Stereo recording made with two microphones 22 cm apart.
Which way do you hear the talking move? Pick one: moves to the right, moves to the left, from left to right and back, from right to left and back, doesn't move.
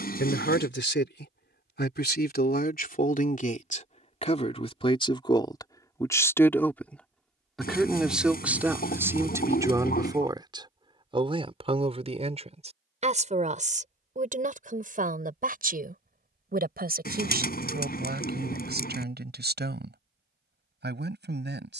moves to the right.